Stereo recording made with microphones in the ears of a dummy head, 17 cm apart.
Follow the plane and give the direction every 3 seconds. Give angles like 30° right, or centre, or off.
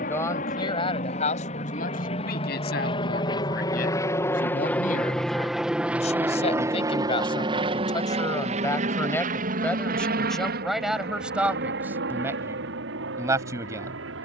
40° left, 10° left, 20° right, 50° right, 60° right.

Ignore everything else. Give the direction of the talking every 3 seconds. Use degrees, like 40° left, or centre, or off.
40° left, 50° left, 20° left, centre, 10° right.